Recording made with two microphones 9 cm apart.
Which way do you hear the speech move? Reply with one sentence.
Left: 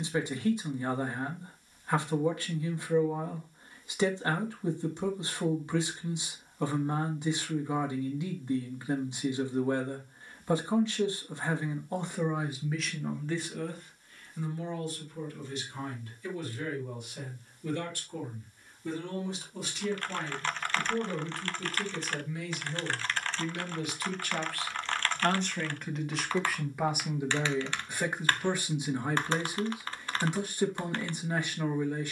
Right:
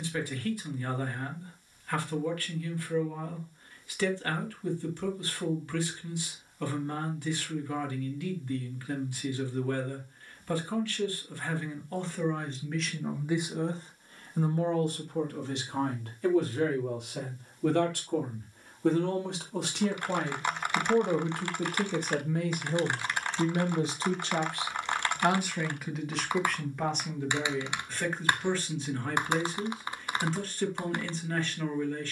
You can hear the speech move from left to right and back again.